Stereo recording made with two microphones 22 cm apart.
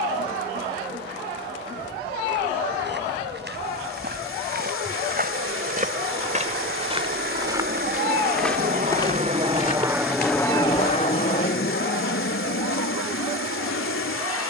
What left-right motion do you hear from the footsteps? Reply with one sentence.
You can hear the footsteps go from the right side to the left.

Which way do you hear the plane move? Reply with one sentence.
You can hear the plane travel towards the left.